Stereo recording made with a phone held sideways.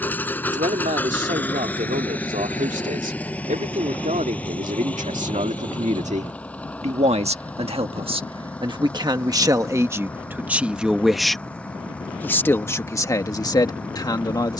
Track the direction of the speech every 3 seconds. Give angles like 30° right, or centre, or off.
70° right, 60° right, 40° right, 10° right, 20° left.